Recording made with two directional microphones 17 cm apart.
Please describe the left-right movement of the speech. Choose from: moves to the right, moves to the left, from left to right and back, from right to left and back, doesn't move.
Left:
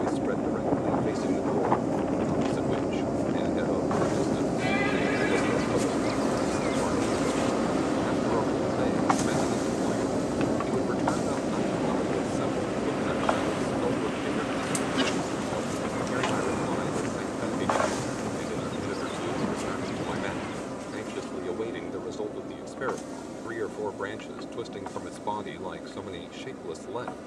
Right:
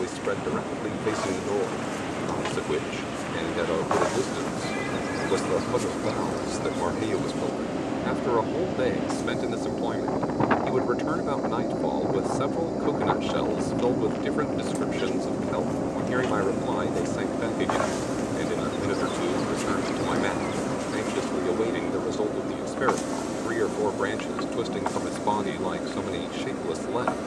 doesn't move.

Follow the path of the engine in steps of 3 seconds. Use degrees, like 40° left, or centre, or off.
40° left, 30° left, 20° left, centre, 10° right, 30° right, 40° right, 40° right, 50° right.